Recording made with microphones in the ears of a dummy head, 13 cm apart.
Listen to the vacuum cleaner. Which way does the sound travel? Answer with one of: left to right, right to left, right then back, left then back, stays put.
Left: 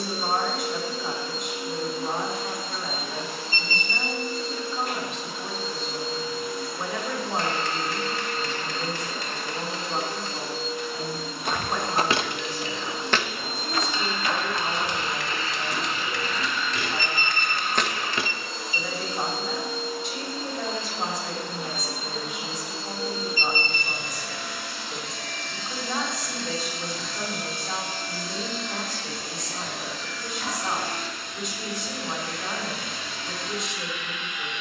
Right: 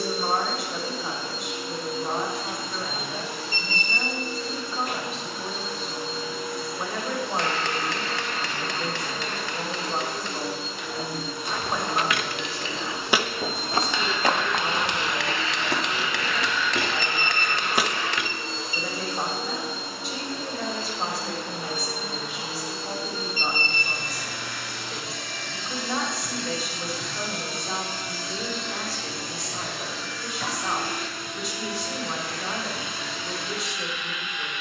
stays put.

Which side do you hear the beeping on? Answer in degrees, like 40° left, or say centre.
50° left.